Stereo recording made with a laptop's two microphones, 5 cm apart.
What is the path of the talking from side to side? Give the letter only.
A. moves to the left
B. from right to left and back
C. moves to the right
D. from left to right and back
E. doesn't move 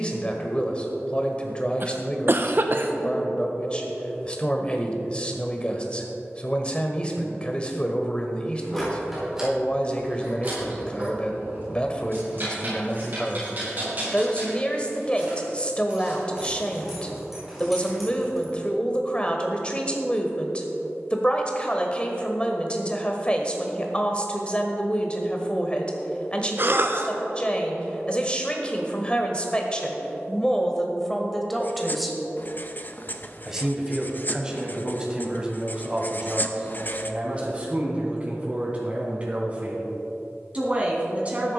C.